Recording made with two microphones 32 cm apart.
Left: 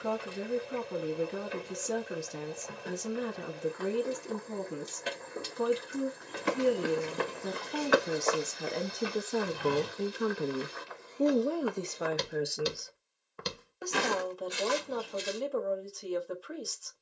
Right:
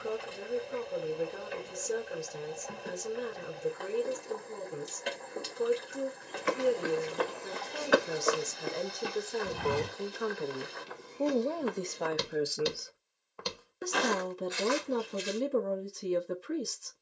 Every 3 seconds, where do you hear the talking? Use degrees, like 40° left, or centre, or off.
80° left, 80° left, 70° left, 40° left, 20° right, 30° right.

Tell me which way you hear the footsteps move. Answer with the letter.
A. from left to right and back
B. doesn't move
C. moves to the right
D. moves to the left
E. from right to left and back
A.